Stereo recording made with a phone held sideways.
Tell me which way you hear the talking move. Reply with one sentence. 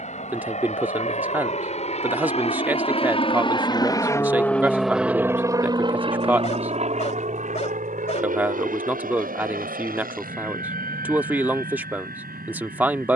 In this clip you hear the talking stay put.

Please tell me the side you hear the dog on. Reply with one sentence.
In this clip you hear the dog on the left.